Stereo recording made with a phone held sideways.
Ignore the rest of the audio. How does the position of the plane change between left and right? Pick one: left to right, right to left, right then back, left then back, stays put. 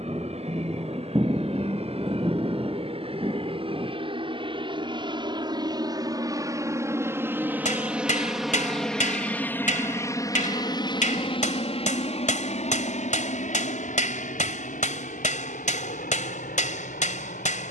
right to left.